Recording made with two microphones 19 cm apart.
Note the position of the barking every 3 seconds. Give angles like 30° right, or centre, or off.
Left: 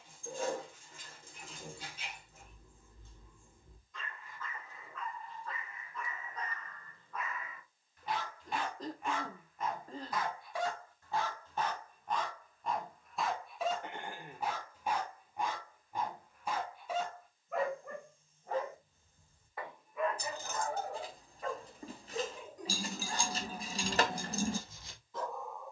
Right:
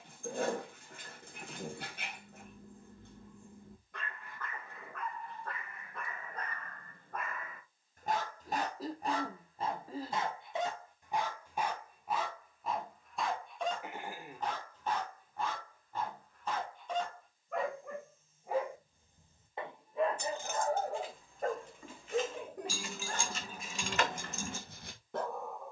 70° right, 70° right, 60° right, 20° right, centre, 10° left, 30° right, 70° right, 70° right.